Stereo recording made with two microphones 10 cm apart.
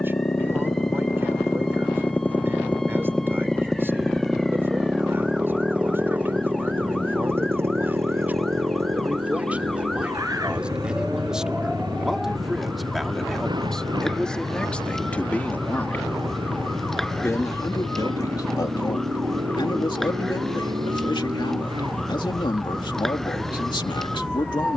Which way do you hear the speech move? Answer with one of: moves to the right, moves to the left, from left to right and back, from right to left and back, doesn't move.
moves to the left.